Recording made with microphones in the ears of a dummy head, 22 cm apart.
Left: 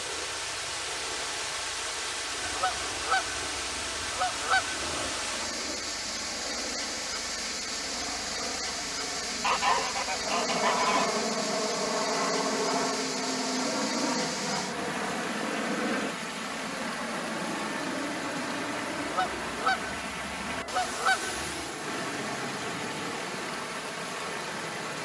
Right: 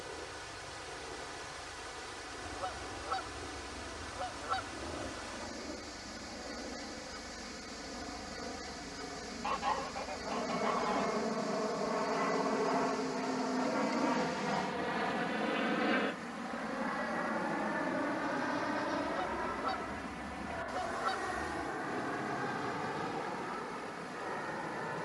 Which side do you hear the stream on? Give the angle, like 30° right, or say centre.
70° left.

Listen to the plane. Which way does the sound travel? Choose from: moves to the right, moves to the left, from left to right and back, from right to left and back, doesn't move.
moves to the right.